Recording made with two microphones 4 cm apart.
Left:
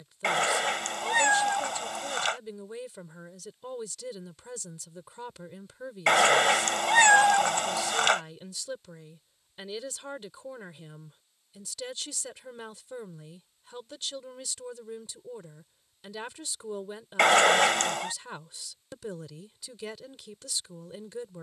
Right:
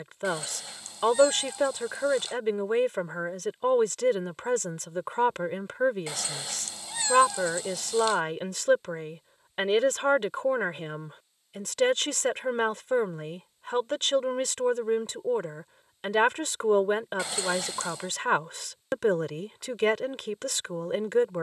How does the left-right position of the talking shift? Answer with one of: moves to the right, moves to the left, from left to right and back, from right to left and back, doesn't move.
doesn't move.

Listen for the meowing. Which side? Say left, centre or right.
left.